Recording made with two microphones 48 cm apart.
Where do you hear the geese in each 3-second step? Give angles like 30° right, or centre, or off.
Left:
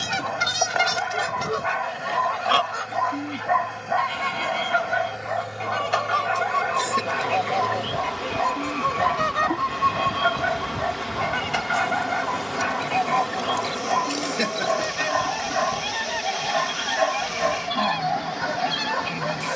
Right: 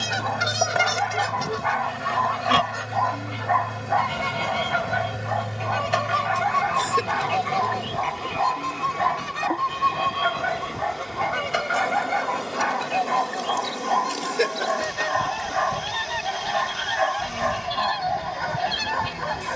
10° right, 50° right, 30° right, centre, 20° left, 30° left, 30° left.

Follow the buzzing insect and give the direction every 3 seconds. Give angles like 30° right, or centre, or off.
50° right, 50° right, 10° right, 20° left, centre, 30° right, 50° right.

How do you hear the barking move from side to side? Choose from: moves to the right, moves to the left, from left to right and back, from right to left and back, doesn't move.
doesn't move.